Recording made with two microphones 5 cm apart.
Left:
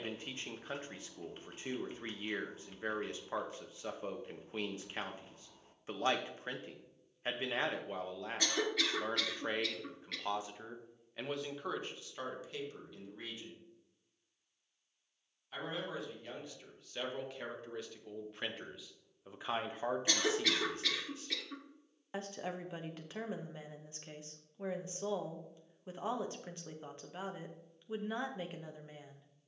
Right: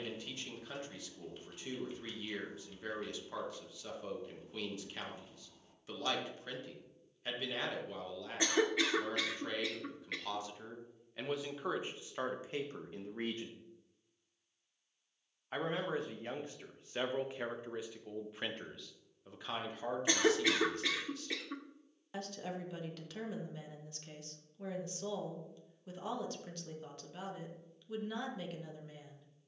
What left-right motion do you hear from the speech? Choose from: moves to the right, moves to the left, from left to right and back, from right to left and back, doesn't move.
from left to right and back.